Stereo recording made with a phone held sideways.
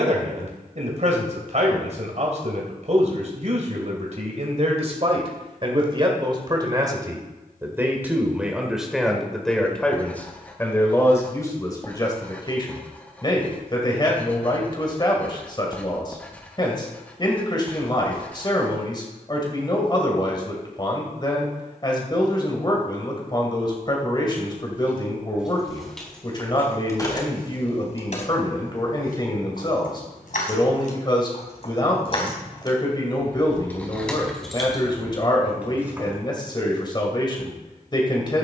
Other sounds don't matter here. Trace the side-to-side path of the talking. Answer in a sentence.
You can hear the talking move from right to left.